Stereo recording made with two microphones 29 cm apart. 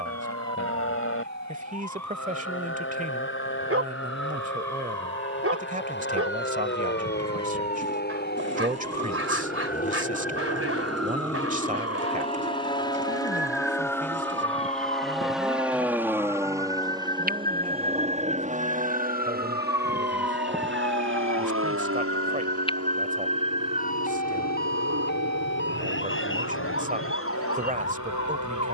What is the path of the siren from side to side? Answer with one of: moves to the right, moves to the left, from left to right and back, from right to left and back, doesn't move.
moves to the left.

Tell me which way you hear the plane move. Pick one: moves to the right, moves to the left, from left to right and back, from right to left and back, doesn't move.
moves to the right.